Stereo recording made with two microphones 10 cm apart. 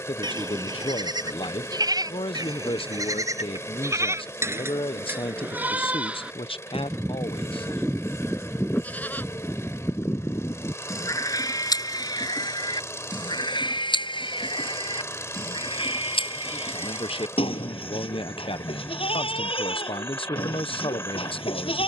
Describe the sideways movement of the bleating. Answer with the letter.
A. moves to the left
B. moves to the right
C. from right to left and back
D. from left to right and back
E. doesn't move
A.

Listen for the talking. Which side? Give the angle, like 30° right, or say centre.
70° left.